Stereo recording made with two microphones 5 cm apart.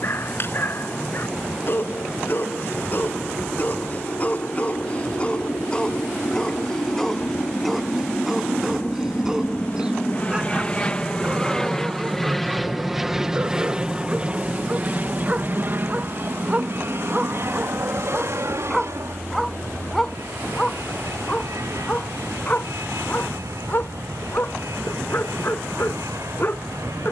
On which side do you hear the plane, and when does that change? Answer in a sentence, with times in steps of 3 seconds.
In this clip you hear the plane on the left from 0 s, in the centre from 12 s and on the right from 15 s.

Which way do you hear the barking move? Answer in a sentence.
You can hear the barking move from left to right and back again.